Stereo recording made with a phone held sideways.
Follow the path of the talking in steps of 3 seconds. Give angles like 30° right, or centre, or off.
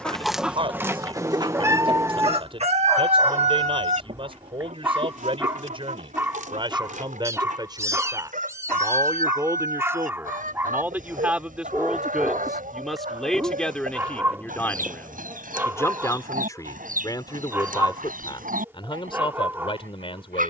40° right, 40° right, 30° right, 10° right, 10° left, 30° left, 40° left.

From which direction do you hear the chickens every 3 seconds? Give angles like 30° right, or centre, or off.
30° right, 60° right, 70° right, 80° right, 80° right, 80° right, 80° right.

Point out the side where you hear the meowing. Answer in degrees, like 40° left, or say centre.
20° right.